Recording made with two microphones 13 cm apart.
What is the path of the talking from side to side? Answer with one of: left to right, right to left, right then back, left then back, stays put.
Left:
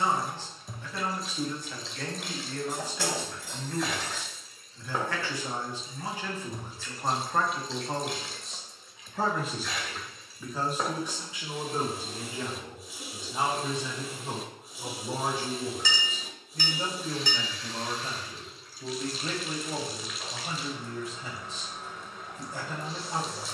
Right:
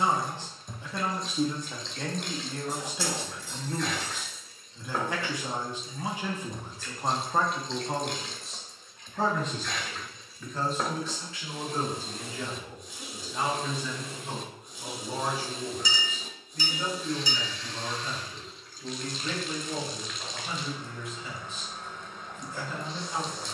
right to left.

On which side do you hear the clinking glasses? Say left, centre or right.
left.